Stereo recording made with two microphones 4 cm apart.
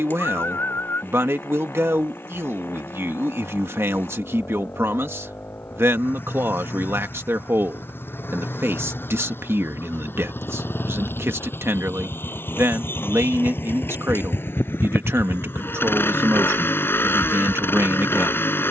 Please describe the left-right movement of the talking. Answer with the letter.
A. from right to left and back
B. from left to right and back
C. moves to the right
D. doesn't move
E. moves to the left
D.